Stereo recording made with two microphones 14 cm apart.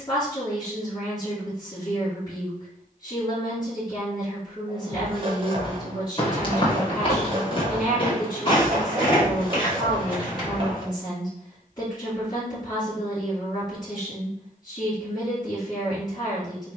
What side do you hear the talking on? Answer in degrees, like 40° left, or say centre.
30° left.